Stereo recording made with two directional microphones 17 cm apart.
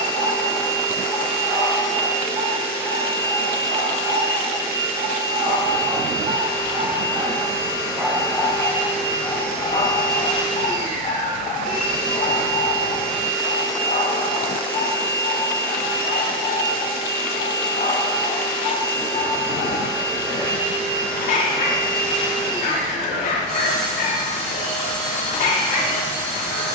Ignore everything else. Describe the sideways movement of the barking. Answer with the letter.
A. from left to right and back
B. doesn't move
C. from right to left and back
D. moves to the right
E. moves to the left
E.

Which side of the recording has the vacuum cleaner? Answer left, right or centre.
right.